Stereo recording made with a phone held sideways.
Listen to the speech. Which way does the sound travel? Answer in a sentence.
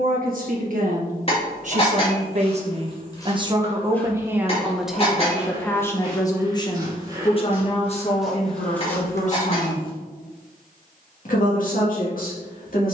You can hear the speech go from the right side to the left.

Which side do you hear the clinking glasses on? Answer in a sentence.
In this clip you hear the clinking glasses on the left.